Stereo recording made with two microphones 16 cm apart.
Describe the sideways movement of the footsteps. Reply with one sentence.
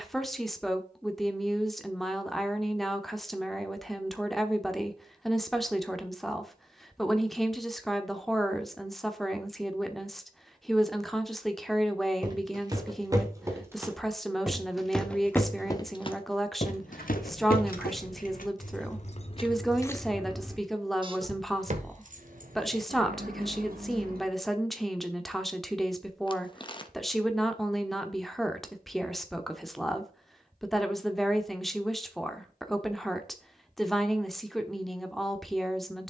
You can hear the footsteps move to the left.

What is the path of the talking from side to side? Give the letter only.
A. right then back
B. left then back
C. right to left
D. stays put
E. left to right
D.